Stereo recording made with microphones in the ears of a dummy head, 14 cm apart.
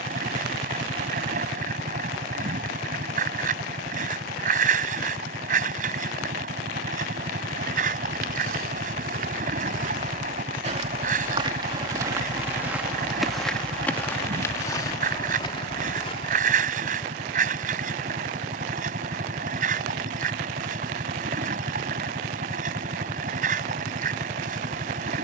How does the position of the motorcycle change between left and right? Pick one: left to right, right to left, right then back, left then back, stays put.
stays put.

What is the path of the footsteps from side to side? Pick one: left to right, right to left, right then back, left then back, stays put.
right to left.